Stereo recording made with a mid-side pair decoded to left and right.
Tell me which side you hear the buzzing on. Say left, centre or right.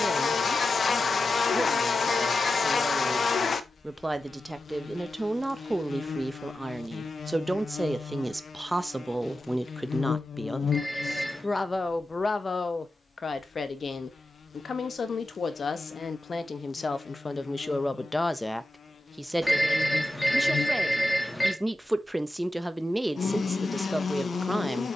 left.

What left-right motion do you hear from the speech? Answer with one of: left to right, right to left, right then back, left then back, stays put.
left then back.